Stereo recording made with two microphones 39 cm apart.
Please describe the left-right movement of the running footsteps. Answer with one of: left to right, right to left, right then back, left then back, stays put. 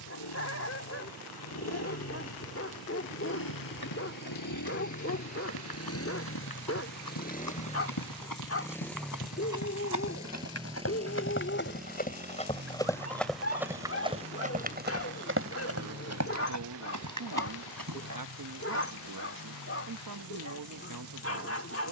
left to right.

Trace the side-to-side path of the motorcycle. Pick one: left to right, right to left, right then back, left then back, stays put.
left to right.